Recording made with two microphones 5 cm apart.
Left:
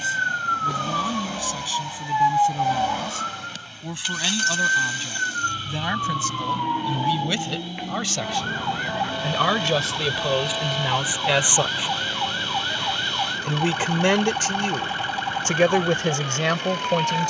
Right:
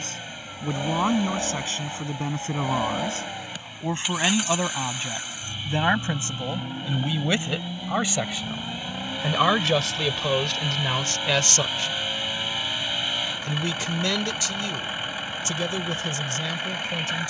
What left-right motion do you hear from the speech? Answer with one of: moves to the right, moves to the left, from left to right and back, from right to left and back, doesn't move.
moves to the left.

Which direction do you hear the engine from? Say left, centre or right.
centre.